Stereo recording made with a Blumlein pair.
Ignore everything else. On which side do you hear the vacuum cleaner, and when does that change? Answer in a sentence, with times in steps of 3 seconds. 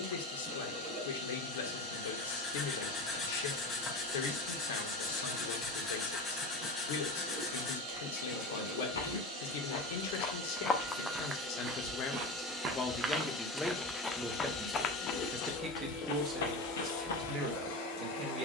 You can hear the vacuum cleaner on the right from 0 s, in the centre from 12 s and on the left from 15 s.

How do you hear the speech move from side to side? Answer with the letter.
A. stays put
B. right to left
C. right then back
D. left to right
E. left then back
D.